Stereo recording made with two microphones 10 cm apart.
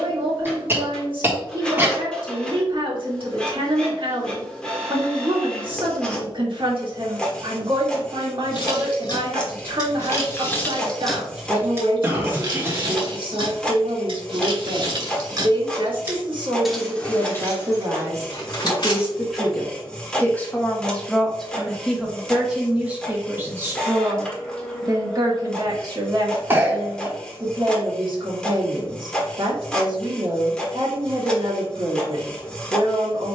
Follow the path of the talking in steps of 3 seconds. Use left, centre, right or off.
right, right, right, right, right, right, centre, centre, right, right, right.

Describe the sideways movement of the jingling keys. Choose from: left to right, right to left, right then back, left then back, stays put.
right then back.